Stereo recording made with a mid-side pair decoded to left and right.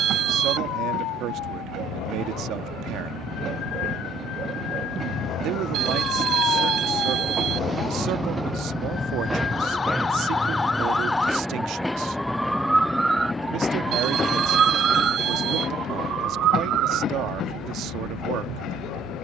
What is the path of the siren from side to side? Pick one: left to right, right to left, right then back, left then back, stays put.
left to right.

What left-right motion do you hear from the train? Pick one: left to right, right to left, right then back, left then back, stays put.
right to left.